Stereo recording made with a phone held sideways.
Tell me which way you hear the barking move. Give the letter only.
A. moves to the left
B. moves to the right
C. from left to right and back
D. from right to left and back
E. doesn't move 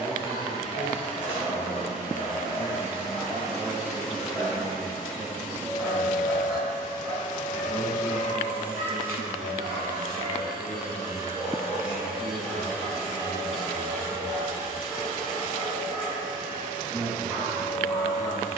C.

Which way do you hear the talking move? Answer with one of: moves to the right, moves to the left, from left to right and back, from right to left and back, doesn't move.
moves to the left.